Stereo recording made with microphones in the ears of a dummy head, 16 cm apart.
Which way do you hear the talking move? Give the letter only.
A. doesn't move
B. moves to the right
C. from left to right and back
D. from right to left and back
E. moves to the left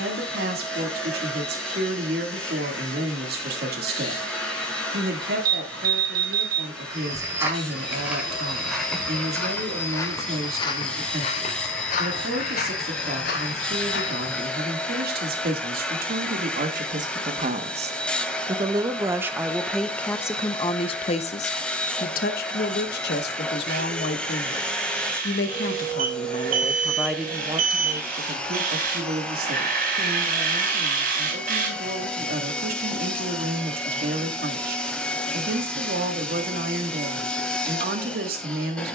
D.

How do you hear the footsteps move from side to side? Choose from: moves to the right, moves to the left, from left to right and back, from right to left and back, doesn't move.
moves to the left.